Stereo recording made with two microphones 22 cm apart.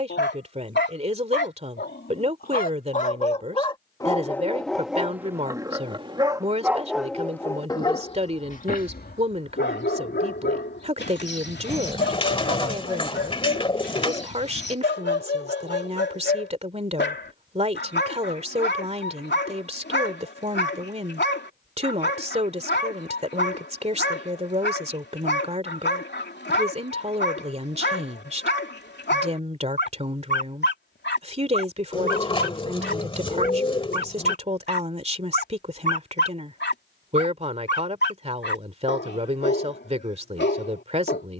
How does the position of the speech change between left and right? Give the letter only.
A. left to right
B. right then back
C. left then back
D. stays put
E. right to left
D.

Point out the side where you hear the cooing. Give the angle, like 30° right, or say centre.
20° left.